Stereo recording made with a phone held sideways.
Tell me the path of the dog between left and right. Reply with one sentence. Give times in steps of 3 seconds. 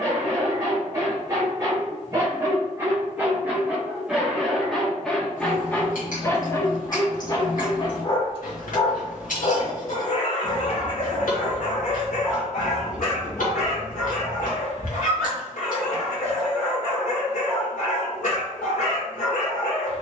You can hear the dog on the right from 0 s, in the centre from 3 s and on the left from 6 s.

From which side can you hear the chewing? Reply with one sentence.
You can hear the chewing on the left.